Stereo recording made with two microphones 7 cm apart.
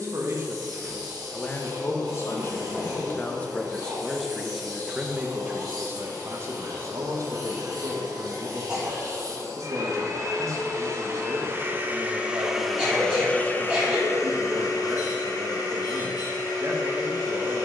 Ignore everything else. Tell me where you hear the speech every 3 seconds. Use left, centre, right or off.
centre, centre, right, right, right, right.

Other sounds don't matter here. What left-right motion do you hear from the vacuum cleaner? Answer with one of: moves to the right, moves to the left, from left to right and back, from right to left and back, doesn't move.
moves to the left.